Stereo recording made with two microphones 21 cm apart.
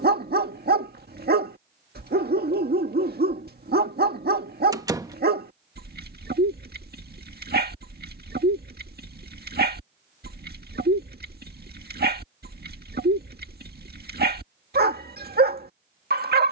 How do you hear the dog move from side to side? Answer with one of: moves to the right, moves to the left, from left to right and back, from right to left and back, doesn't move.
doesn't move.